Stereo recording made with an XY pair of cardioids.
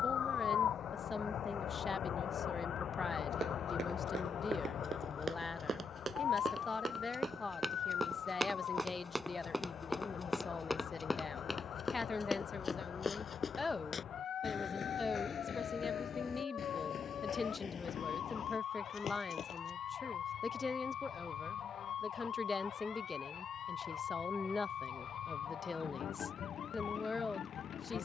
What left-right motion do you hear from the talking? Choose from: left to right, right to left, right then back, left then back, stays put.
stays put.